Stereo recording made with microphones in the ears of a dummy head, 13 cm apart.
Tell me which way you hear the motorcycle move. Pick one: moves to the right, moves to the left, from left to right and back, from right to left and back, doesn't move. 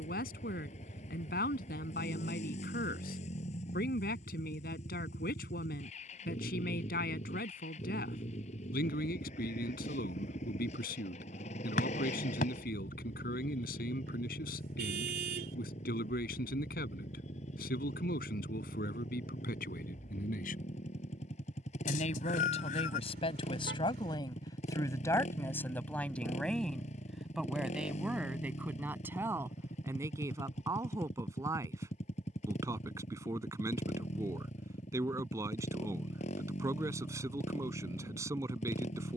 doesn't move.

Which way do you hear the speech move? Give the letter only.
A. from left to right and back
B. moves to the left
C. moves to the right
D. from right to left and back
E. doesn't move
C.